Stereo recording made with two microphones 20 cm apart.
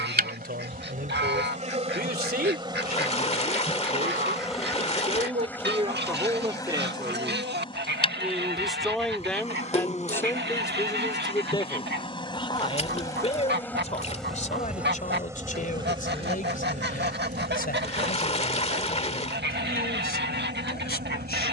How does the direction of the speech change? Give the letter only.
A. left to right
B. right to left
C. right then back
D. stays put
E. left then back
B.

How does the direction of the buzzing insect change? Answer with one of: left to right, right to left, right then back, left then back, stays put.
left then back.